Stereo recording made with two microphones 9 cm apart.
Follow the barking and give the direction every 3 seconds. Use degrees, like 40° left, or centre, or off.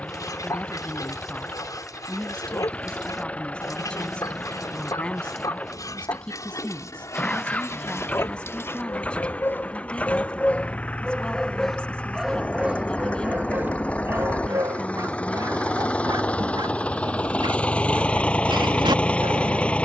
50° left, 50° left, 40° left, 20° left, 20° right, 50° right, 60° right.